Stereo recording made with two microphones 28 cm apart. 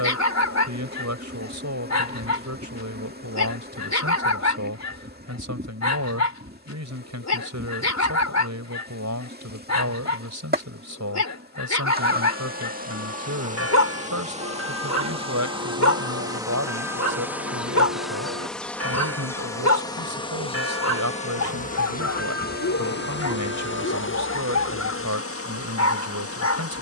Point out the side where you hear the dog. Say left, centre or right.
left.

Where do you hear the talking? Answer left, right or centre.
right.